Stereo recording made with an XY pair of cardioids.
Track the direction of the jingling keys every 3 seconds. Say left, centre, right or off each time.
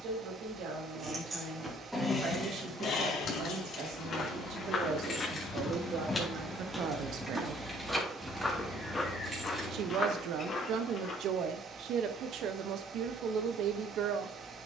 centre, left, centre, right, off.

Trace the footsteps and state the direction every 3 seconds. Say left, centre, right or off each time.
off, left, centre, left, off.